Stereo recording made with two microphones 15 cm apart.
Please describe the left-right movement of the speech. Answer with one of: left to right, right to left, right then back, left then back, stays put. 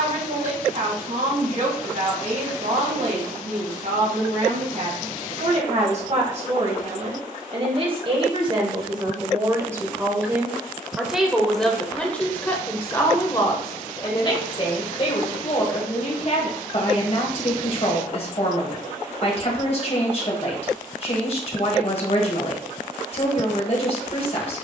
right to left.